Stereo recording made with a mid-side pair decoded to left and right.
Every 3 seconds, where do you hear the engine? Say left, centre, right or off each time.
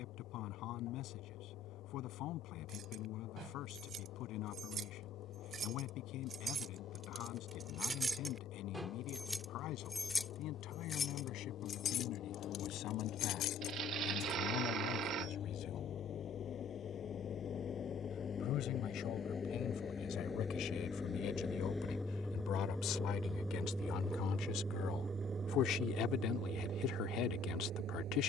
left, left, left, left, left, left, left, centre, right, right.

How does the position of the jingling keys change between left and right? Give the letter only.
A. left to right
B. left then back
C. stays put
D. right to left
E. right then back
D.